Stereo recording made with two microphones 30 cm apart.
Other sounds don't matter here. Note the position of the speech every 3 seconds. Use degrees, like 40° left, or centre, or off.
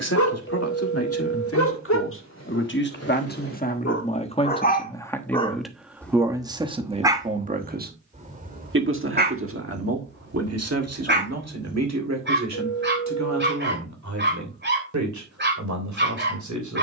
50° left, 20° left, 20° right, 50° right, 70° right, 70° right.